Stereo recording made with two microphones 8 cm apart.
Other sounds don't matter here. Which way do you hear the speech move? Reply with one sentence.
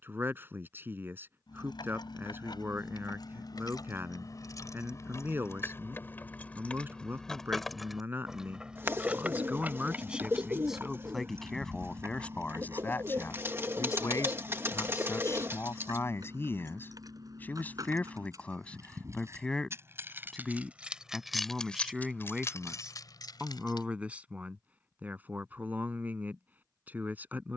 You can hear the speech move from right to left and back again.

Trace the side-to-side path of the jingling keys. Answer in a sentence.
You can hear the jingling keys move from left to right and back again.